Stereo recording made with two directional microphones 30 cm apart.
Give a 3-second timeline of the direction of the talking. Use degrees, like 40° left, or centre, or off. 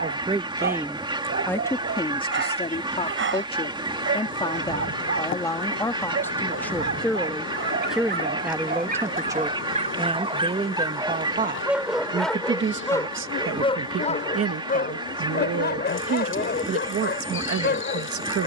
10° left, 10° left, centre, 20° right, 40° right, 50° right.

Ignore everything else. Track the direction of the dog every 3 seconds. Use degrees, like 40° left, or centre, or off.
40° right, 40° right, 40° right, 20° right, 10° left, 30° left.